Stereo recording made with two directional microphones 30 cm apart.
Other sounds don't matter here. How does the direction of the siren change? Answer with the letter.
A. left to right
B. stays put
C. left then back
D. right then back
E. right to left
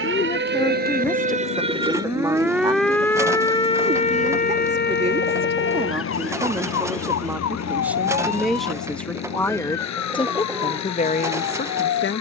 E.